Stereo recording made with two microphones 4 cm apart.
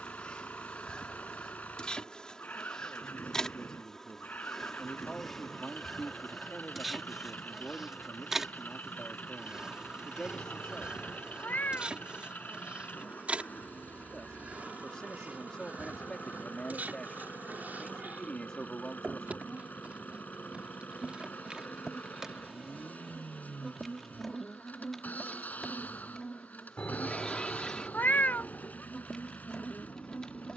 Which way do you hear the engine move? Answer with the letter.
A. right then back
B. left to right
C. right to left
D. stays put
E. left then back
D.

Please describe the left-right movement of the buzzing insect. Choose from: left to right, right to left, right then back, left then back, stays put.
right then back.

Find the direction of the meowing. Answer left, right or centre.
left.